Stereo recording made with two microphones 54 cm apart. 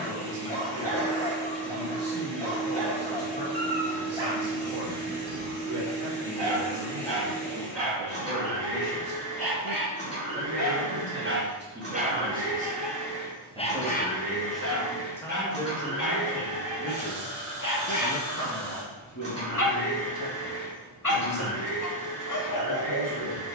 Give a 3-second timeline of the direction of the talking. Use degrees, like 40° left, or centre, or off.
50° right, 50° right, 40° right, 20° right, 10° right, 10° left, 40° left, 50° left.